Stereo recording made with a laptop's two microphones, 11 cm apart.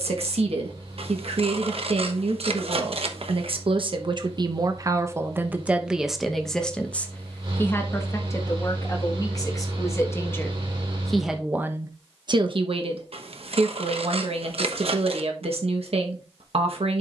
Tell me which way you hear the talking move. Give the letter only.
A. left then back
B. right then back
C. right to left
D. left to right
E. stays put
A.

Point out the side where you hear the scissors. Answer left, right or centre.
right.